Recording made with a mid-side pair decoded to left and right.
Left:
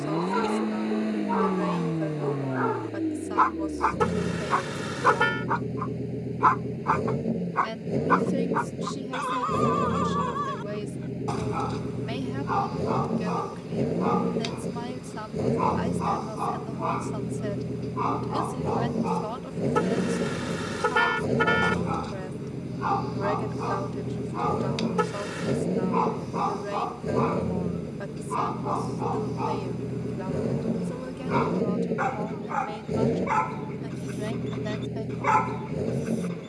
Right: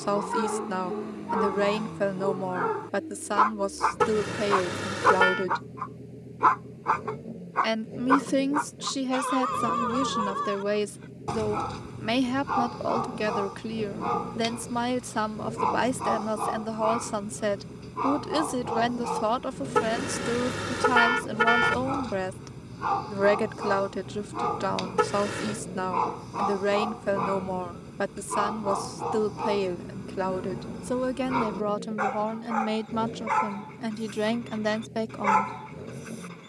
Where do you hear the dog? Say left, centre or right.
centre.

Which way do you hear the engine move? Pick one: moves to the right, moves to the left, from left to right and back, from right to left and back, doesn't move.
doesn't move.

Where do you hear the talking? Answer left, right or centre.
right.